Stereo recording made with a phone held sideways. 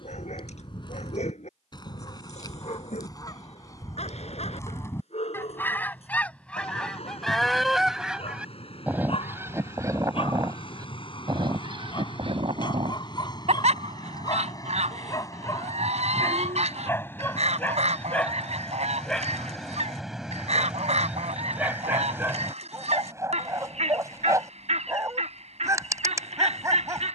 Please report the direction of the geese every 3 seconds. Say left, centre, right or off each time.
left, left, centre, right, right, right, right, right, right.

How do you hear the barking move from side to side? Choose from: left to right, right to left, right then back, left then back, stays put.
left to right.